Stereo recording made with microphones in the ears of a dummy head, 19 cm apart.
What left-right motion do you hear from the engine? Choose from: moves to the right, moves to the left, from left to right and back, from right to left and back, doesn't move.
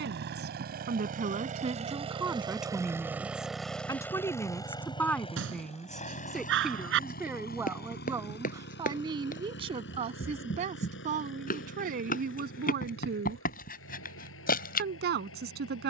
moves to the left.